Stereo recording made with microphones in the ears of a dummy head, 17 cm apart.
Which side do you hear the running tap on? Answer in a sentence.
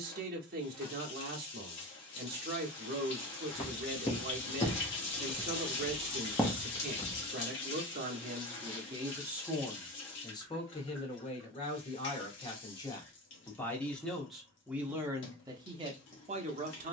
In this clip you hear the running tap on the left.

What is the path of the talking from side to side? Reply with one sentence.
You can hear the talking move from right to left and back again.